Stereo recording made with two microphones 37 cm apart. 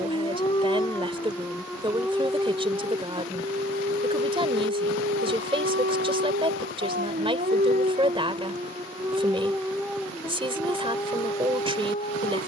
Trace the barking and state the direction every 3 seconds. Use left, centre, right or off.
centre, right, right, centre.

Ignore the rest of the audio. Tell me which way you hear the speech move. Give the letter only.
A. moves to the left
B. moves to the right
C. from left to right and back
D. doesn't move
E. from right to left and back
D.